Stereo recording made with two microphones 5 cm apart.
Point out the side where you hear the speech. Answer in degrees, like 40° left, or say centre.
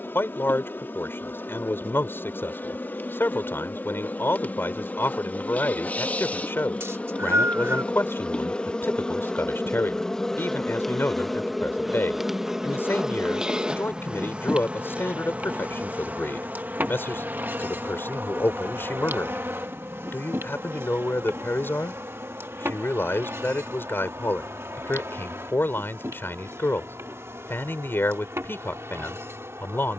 50° left.